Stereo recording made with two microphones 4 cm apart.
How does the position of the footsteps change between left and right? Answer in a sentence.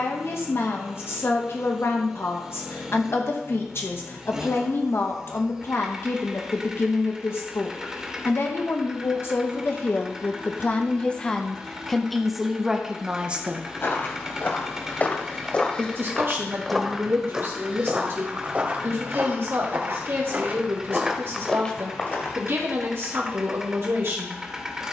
You can hear the footsteps go right and come back.